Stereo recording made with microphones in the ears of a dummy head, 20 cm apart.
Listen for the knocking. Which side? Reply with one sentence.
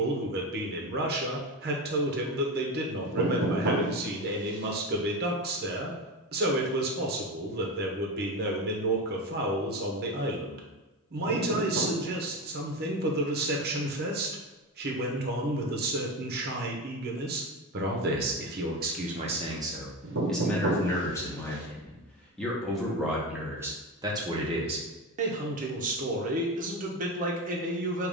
In this clip you hear the knocking on the right.